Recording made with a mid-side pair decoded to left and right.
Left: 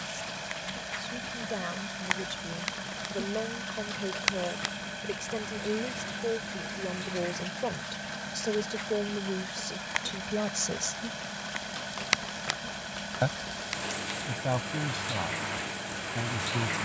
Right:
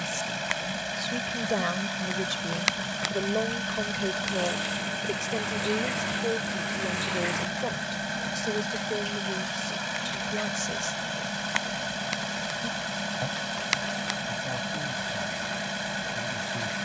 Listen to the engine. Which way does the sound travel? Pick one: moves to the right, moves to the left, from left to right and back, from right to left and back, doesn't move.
doesn't move.